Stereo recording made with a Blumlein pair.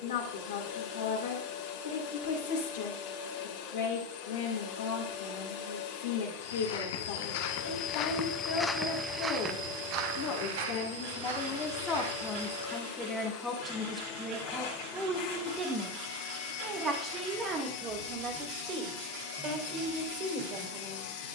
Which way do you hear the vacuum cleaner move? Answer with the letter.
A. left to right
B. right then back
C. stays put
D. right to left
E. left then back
C.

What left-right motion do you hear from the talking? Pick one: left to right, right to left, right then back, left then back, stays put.
left to right.